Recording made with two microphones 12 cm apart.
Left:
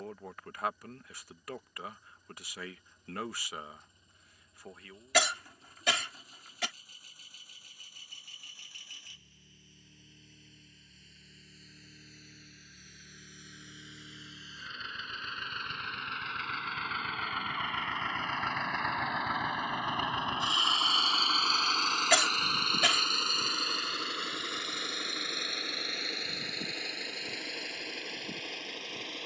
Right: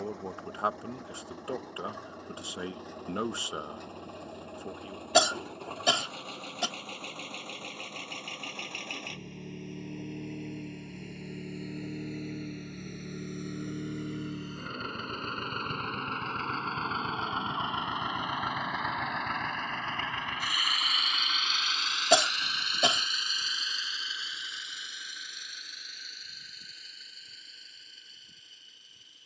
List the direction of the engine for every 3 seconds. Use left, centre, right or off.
right, right, right, right, right, right, centre, left, left, left.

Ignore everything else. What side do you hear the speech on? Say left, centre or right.
right.